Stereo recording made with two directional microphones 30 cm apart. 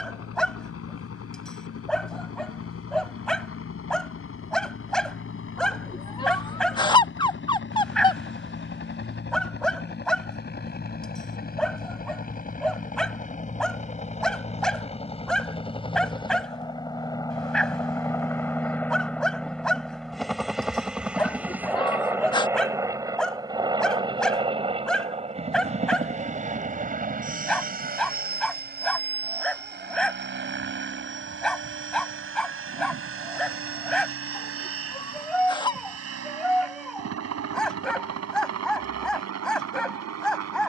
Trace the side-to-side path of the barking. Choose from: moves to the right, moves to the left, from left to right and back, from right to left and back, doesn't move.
doesn't move.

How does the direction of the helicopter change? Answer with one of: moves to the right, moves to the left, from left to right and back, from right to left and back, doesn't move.
moves to the right.